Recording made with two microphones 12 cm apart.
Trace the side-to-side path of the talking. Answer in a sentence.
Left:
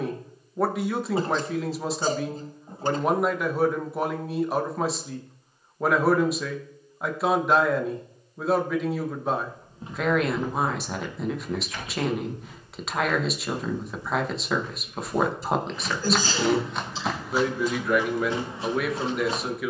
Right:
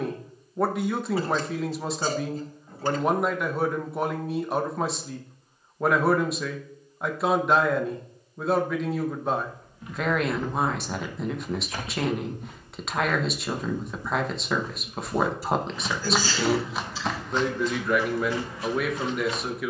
In this clip you hear the talking stay in one place.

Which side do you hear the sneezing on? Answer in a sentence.
You can hear the sneezing on the left.